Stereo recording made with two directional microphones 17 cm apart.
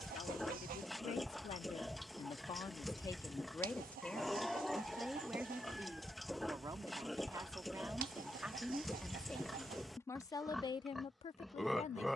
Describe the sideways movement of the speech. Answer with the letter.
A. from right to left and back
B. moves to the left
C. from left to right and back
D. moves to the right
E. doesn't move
C.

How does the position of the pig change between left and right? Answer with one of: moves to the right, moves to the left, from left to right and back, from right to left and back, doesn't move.
doesn't move.